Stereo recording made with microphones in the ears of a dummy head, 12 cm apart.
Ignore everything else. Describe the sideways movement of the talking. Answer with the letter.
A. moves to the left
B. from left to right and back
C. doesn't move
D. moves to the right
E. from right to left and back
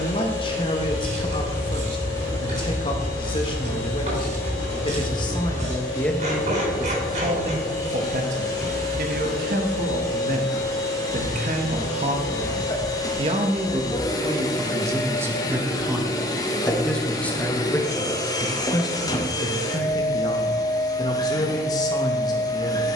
B.